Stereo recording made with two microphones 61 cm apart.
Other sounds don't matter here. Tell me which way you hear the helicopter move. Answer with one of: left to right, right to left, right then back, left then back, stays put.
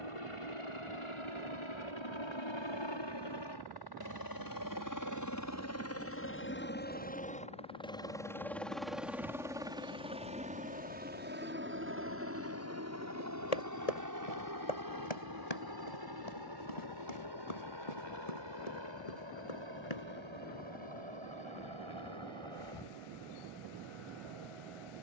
left to right.